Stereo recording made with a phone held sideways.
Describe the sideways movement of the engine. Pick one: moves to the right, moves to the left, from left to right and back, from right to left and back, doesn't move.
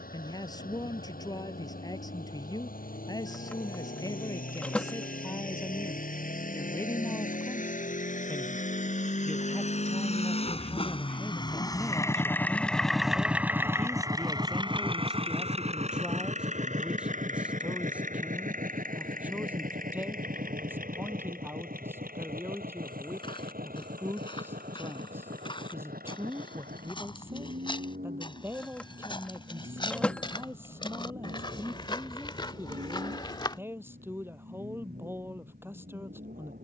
moves to the right.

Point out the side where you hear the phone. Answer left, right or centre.
centre.